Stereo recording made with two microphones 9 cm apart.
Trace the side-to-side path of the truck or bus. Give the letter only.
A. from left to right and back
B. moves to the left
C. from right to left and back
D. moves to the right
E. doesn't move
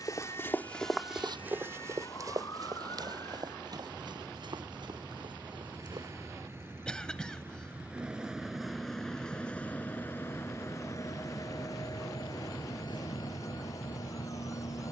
B.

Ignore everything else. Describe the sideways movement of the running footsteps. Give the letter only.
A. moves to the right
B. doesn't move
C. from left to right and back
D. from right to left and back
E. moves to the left
A.